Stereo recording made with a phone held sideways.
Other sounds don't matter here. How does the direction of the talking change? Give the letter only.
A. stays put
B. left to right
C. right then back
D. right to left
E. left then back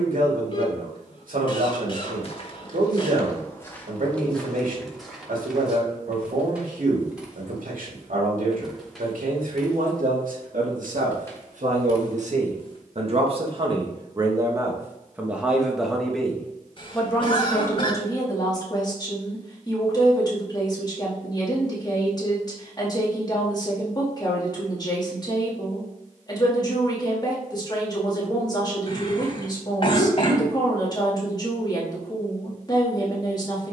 D.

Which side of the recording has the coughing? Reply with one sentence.
In this clip you hear the coughing on the left.